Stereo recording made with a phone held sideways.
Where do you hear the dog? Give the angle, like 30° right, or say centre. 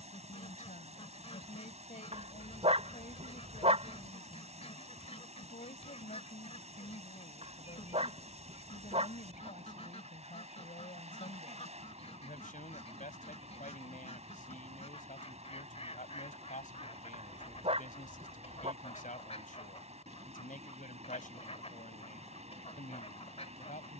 40° right.